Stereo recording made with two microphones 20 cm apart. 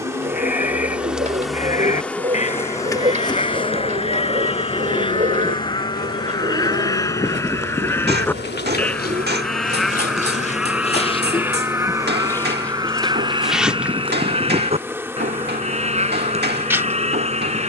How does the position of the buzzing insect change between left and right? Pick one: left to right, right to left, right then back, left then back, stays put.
left then back.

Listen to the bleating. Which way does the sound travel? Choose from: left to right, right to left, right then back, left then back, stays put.
left to right.